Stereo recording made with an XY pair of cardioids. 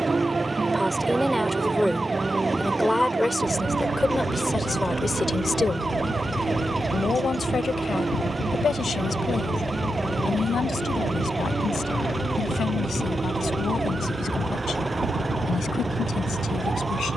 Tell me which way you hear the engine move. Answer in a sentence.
You can hear the engine stay in one place.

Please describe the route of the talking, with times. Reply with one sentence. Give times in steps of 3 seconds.
You can hear the talking in the centre from 0 s and on the left from 3 s.